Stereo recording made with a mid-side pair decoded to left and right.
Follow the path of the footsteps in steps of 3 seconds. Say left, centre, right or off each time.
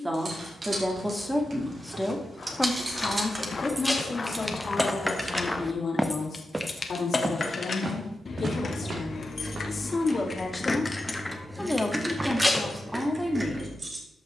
left, left, right, right, off.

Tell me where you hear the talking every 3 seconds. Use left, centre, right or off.
centre, left, left, left, centre.